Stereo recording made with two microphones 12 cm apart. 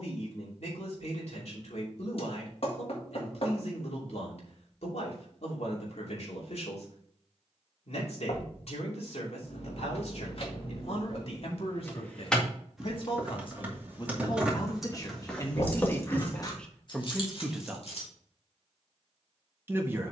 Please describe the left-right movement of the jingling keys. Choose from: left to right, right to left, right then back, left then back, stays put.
right then back.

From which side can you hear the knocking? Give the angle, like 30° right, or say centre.
50° left.